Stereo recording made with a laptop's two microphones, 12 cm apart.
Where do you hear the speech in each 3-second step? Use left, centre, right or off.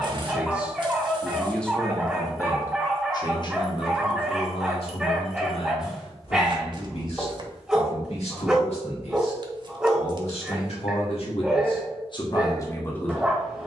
centre, left, left, left, left.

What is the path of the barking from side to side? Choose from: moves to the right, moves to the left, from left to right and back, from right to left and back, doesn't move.
doesn't move.